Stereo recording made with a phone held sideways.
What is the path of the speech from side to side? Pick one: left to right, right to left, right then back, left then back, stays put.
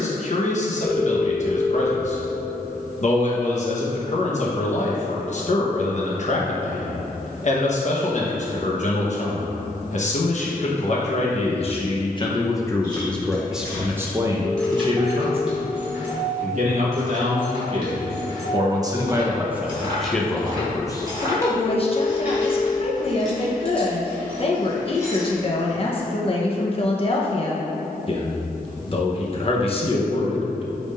right then back.